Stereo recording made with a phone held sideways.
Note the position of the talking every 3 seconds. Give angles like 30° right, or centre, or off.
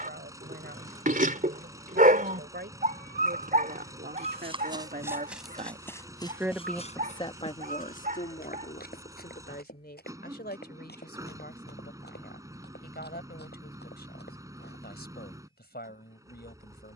80° right, 70° right, 30° left, 70° left, 70° left, 70° left.